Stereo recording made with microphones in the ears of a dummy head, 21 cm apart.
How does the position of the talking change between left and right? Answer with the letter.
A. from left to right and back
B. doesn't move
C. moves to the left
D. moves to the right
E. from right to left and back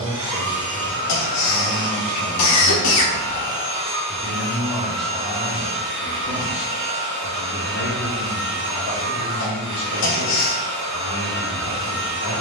C.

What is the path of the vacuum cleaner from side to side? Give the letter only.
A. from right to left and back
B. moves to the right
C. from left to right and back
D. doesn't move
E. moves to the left
D.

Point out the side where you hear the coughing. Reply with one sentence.
You can hear the coughing on the left.